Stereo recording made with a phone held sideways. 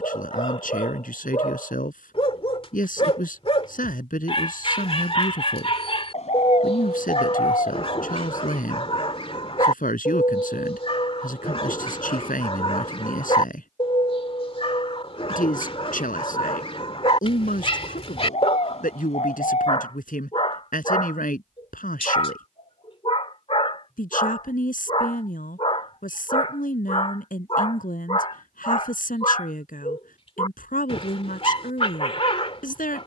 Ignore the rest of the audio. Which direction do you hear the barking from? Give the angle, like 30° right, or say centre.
40° left.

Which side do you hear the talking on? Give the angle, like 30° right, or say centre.
80° left.